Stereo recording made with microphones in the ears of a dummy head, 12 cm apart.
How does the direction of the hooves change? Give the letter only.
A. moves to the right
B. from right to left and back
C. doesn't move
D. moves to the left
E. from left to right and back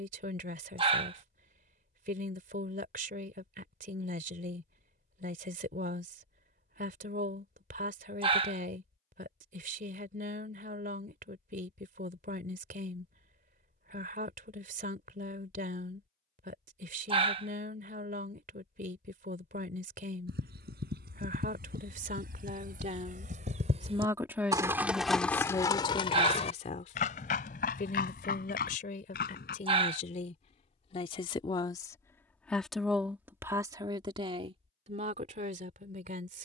D.